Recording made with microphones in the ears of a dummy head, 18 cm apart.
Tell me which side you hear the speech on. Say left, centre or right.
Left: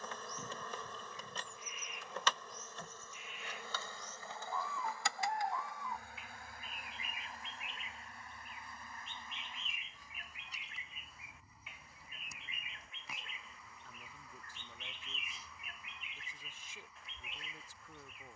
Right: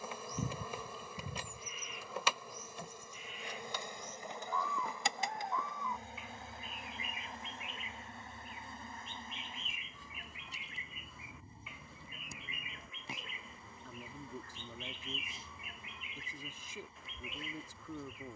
right.